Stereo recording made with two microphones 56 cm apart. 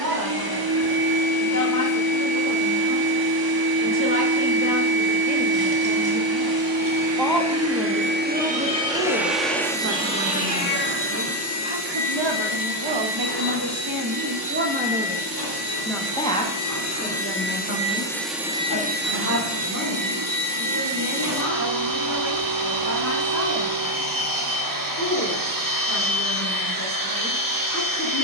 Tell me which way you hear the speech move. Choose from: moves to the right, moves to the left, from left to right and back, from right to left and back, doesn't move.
from left to right and back.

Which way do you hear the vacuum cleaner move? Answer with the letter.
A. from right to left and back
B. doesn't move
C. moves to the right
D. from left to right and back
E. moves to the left
A.